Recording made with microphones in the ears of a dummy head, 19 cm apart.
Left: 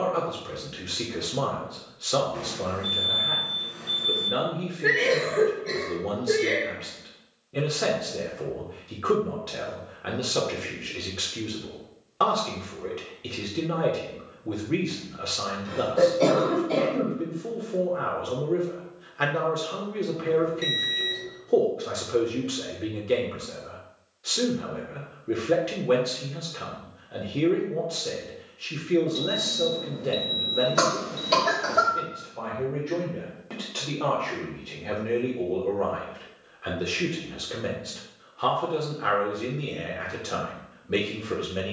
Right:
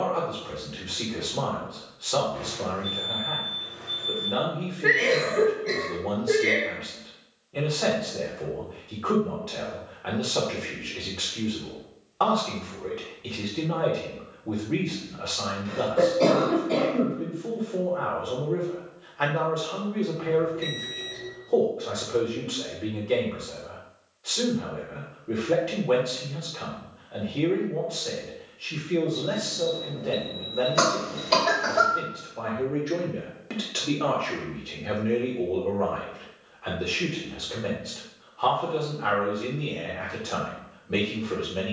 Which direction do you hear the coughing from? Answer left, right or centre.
centre.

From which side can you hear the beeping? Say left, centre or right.
left.